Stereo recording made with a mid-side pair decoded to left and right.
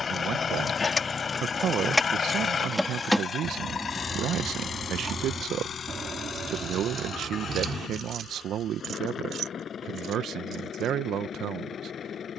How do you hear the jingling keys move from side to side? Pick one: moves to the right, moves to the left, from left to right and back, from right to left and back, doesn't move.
moves to the right.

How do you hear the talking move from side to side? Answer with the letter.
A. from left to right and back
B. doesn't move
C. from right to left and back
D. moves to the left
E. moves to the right
B.